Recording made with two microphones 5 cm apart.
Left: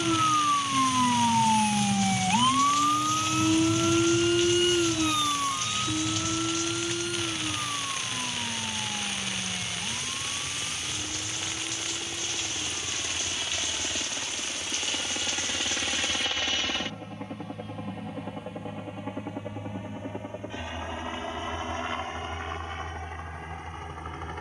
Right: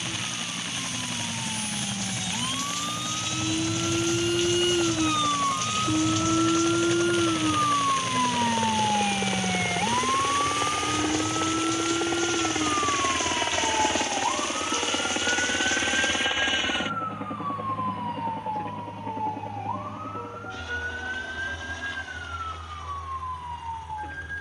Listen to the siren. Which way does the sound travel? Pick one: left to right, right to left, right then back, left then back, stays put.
left to right.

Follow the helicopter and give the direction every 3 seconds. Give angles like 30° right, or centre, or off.
80° right, 70° right, 70° right, 60° right, 40° right, 20° right, 10° left, 40° left.